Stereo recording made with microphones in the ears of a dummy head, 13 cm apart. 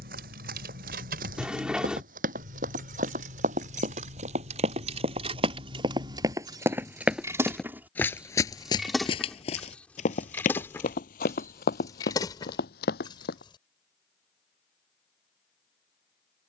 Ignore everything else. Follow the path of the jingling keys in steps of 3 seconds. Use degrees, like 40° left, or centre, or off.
70° right, 50° right, 20° right, 10° left, 30° left, off.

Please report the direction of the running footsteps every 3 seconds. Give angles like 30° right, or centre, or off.
60° right, 40° right, centre, 50° left, 70° left, off.